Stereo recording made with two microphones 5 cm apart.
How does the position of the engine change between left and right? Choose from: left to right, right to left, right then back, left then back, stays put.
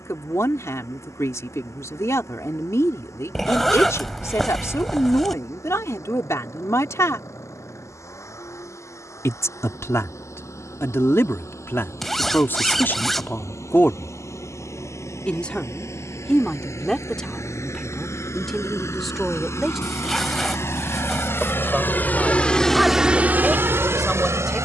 left to right.